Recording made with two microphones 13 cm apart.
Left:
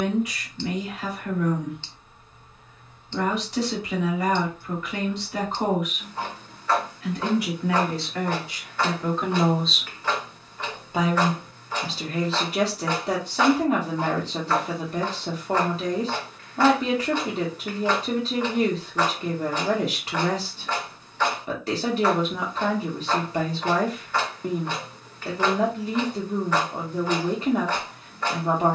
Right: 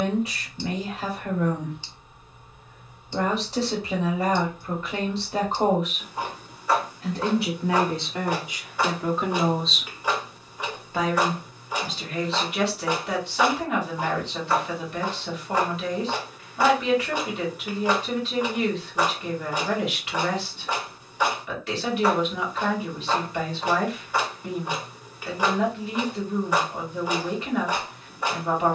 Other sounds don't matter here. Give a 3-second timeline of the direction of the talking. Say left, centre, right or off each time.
right, right, right, centre, left, left, left, left, left, left.